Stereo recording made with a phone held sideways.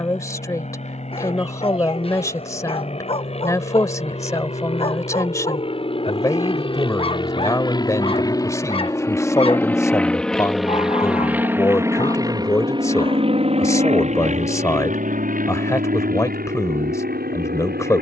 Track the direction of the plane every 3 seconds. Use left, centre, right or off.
left, left, left, centre, right, right.